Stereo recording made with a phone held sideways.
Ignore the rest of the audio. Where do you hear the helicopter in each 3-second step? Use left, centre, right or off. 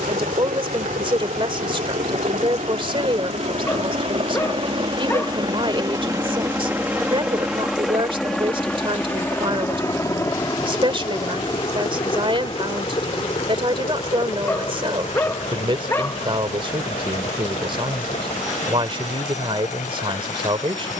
right, right, centre, left, left, left, left.